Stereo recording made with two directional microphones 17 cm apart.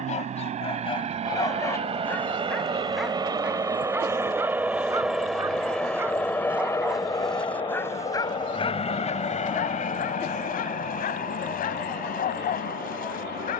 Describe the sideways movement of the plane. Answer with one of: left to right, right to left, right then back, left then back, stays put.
right to left.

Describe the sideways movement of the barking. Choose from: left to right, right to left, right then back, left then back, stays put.
right then back.